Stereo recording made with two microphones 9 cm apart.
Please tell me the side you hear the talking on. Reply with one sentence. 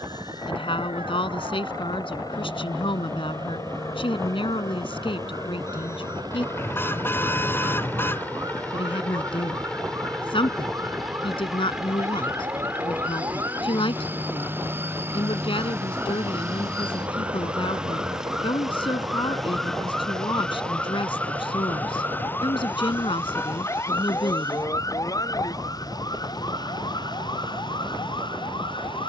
You can hear the talking on the left.